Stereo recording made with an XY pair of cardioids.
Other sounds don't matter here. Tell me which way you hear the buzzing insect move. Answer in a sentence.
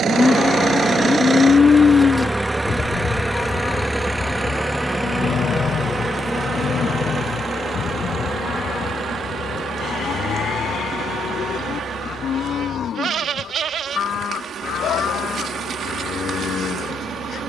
You can hear the buzzing insect move from left to right.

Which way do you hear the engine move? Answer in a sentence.
In this clip you hear the engine move to the left.